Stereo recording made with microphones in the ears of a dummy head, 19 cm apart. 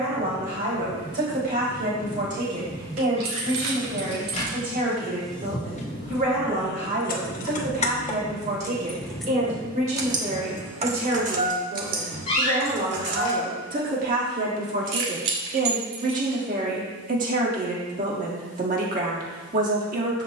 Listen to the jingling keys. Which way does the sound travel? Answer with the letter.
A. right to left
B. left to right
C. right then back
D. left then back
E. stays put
D.